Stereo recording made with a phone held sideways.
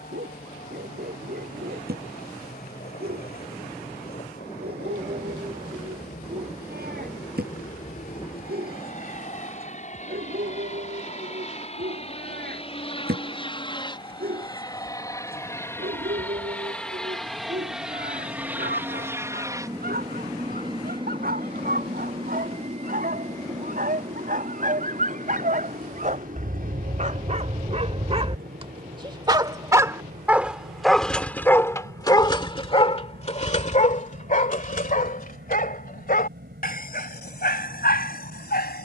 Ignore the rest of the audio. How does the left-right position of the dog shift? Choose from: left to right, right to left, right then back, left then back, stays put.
right to left.